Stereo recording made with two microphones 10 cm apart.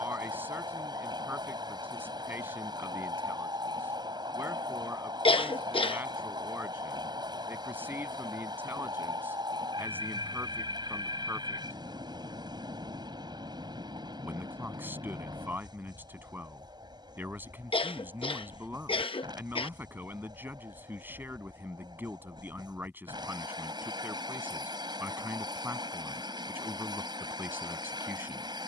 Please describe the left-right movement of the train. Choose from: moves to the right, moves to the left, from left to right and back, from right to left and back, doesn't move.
doesn't move.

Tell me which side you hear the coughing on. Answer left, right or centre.
left.